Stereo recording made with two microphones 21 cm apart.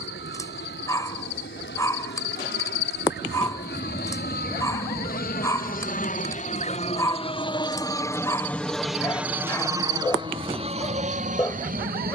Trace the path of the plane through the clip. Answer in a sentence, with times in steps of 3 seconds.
You can hear the plane on the left from 0 s and on the right from 9 s.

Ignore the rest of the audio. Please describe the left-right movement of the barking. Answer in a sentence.
In this clip you hear the barking stay put.